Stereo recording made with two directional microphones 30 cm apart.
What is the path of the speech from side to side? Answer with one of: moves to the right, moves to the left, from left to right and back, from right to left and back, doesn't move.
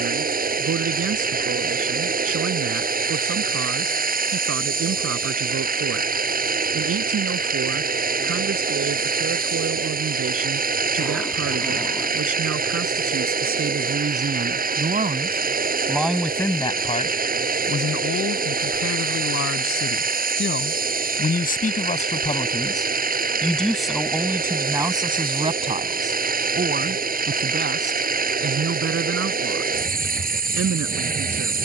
from right to left and back.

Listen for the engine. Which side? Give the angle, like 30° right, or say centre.
30° right.